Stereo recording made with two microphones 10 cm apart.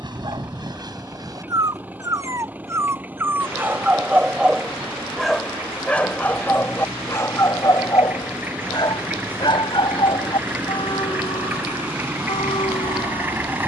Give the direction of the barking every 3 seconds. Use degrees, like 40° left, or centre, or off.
40° right, 10° right, 30° left, 60° left, 70° left.